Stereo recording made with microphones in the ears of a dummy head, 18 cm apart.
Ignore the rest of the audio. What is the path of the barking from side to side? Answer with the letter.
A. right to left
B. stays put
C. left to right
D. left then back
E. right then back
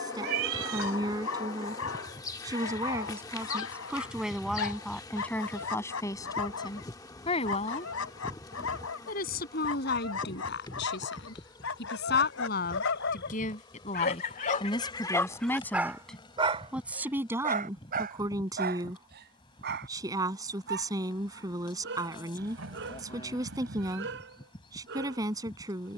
C.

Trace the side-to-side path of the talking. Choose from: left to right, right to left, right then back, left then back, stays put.
left then back.